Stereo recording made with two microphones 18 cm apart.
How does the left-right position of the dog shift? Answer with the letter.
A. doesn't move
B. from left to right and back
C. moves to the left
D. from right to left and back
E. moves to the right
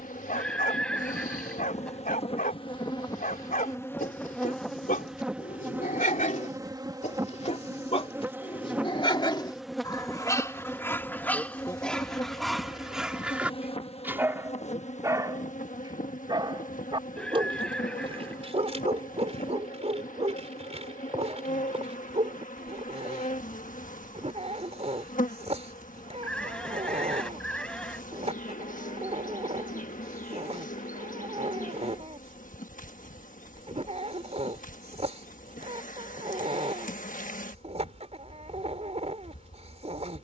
E.